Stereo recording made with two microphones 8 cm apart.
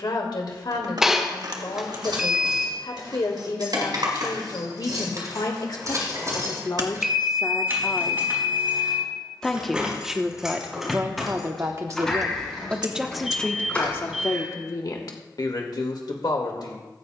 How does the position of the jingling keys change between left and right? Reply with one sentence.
You can hear the jingling keys move to the left.